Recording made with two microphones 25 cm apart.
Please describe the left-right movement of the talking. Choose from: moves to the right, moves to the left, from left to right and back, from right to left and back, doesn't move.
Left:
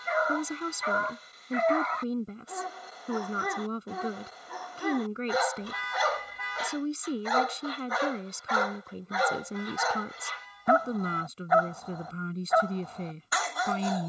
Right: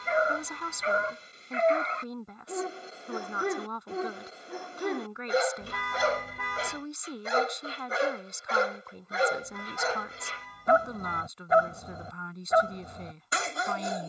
doesn't move.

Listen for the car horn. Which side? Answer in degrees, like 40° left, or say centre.
60° right.